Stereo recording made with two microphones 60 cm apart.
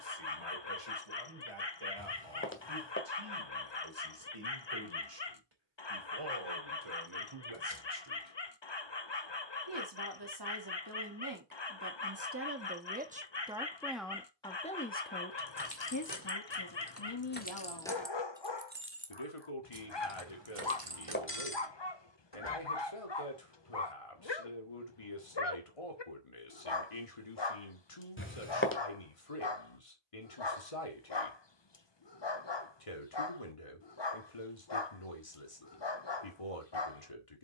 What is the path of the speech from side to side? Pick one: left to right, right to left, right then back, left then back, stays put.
right to left.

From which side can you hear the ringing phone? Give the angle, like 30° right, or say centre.
20° left.